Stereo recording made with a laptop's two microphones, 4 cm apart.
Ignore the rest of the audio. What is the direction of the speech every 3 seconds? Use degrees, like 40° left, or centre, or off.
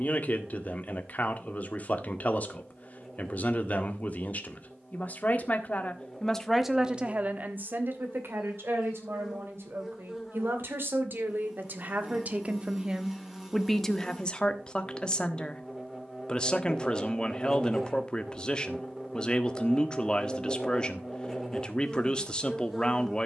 40° left, 40° left, 40° right, 60° right, 10° right, 20° left, 20° left, 20° left.